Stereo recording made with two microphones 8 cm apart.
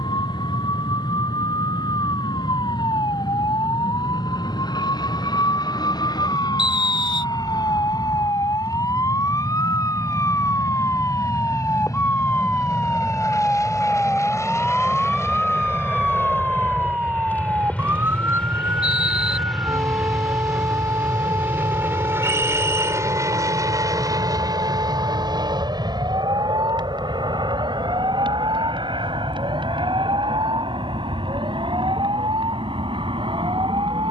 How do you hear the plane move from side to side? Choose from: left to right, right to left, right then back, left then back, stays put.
left to right.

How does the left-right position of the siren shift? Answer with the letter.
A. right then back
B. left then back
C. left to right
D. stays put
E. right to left
C.